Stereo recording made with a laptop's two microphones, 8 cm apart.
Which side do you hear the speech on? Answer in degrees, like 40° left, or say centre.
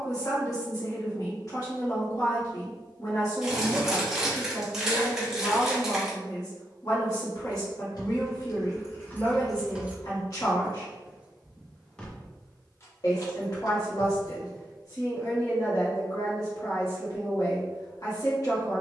50° left.